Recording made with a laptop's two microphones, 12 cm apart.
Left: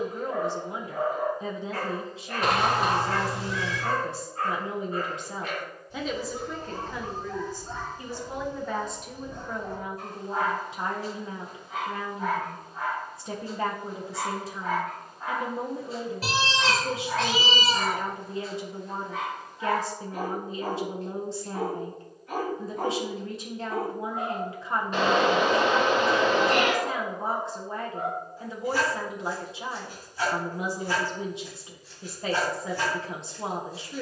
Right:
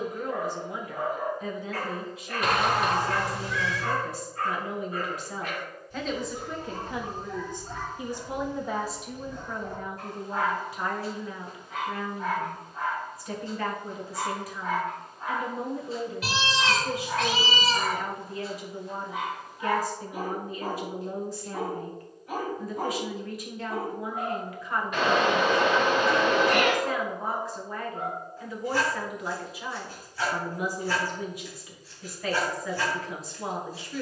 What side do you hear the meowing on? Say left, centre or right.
left.